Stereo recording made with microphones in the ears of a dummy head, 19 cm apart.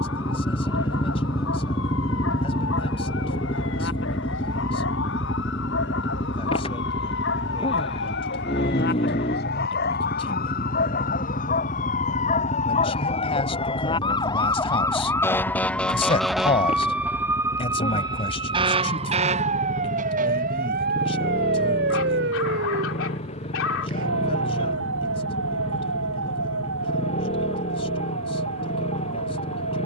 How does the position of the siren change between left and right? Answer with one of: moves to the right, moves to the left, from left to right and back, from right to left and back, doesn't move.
moves to the right.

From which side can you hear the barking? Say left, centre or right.
left.